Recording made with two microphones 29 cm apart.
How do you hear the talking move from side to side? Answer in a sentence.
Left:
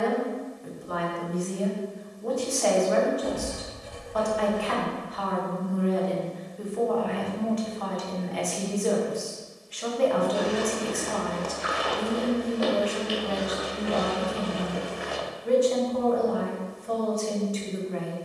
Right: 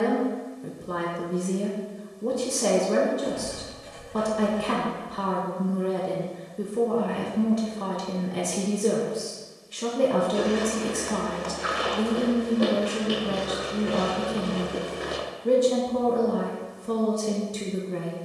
In this clip you hear the talking stay put.